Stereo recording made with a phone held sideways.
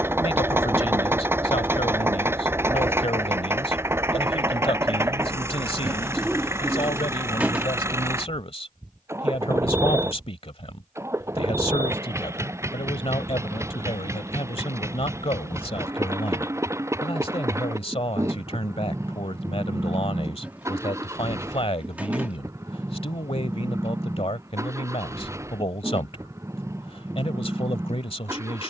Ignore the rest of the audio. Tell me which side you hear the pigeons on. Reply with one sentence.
In this clip you hear the pigeons in the centre.